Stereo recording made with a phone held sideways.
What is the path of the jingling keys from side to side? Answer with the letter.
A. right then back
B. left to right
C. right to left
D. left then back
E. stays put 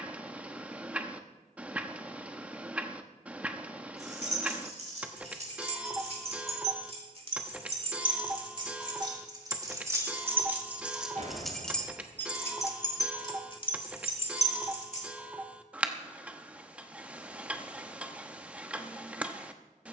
C.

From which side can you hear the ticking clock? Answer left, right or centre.
centre.